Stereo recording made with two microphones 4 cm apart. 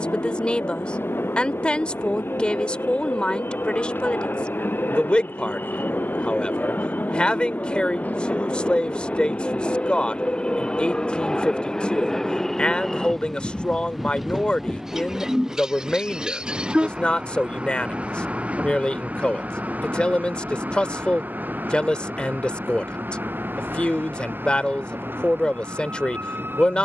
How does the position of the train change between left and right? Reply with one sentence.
You can hear the train go from the left side to the right.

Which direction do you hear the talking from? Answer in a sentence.
In this clip you hear the talking on the left.